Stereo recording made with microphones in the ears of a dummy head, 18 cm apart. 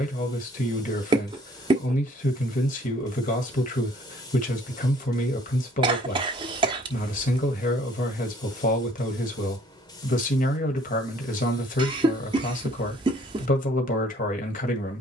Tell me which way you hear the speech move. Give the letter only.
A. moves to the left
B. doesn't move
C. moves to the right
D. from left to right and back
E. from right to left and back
B.